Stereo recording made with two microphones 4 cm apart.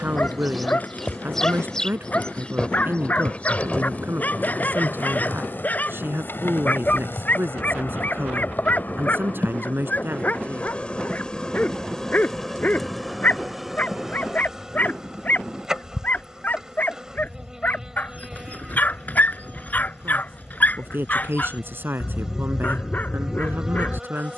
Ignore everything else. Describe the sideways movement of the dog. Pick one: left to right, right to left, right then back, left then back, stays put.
stays put.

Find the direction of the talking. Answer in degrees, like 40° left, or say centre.
50° right.